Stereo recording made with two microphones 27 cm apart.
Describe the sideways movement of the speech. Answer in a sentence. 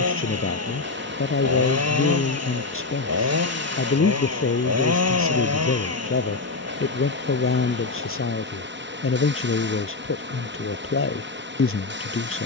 You can hear the speech stay put.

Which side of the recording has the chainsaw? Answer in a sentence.
You can hear the chainsaw on the right.